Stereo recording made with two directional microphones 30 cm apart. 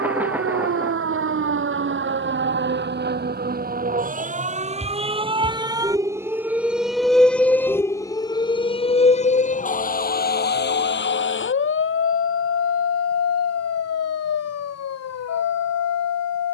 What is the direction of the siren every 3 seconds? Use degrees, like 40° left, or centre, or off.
40° right, 20° right, centre, 30° left, 50° left, 60° left.